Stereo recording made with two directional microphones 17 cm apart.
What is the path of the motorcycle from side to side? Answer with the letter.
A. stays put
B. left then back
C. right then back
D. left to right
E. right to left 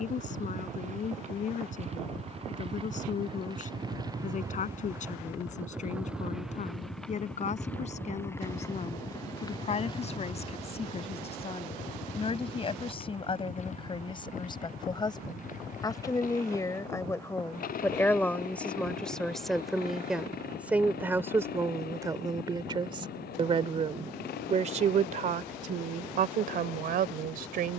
E.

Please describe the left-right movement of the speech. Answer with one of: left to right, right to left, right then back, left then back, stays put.
left to right.